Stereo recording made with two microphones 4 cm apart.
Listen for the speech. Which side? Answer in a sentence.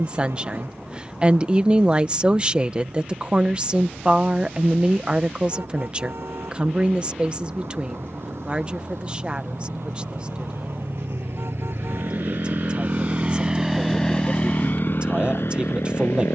In this clip you hear the speech on the right.